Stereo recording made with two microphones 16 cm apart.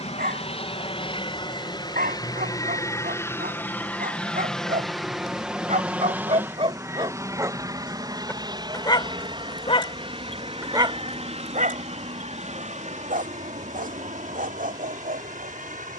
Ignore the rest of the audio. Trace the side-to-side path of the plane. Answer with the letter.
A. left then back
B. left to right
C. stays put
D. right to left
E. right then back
B.